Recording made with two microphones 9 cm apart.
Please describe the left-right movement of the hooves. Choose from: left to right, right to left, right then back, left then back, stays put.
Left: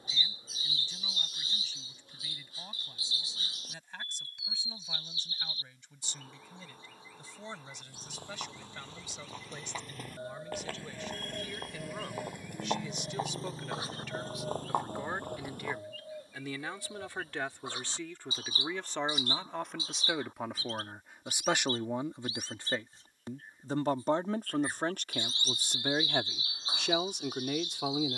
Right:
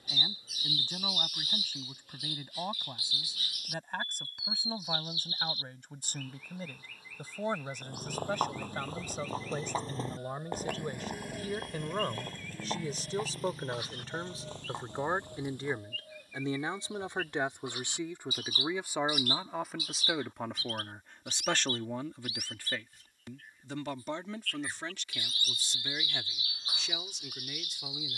right to left.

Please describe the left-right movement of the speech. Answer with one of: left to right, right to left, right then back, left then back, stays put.
right to left.